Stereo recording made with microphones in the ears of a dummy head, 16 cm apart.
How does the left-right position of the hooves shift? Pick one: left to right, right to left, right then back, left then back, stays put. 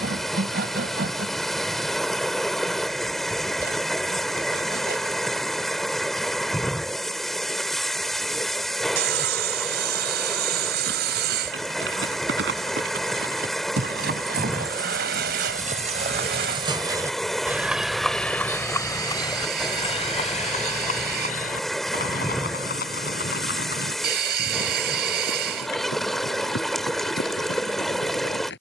right to left.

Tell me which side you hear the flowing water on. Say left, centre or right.
centre.